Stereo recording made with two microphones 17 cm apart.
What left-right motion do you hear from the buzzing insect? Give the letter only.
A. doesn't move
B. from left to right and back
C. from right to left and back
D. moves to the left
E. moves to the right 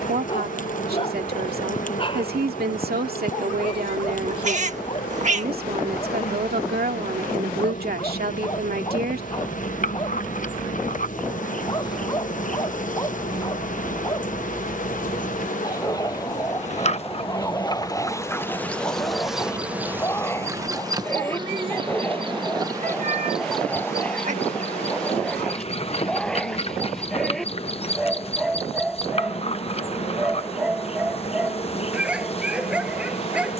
B.